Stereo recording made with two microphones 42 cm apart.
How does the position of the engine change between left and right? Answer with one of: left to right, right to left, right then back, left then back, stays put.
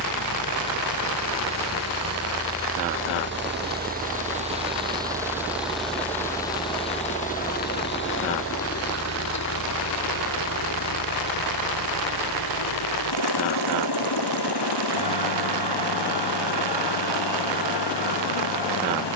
right to left.